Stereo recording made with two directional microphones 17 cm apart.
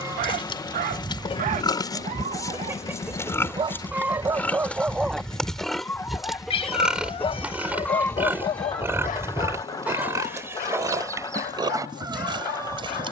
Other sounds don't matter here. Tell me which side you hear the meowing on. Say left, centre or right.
left.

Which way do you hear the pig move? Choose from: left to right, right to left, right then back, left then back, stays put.
left to right.